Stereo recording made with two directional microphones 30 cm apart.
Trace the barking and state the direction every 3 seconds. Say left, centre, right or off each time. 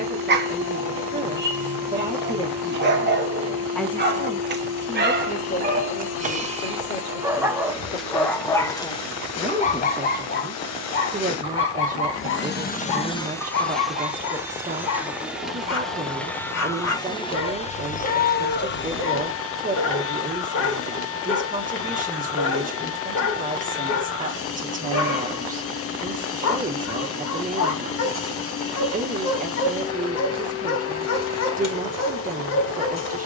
right, right, centre, left, left, left, left, left, left, left, left.